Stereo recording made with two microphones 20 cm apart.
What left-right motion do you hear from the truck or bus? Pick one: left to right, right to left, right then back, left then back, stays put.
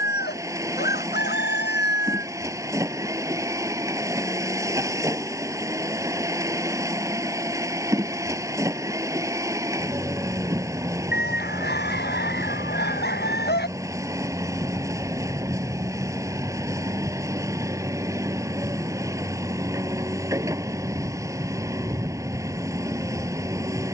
stays put.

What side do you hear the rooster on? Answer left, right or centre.
left.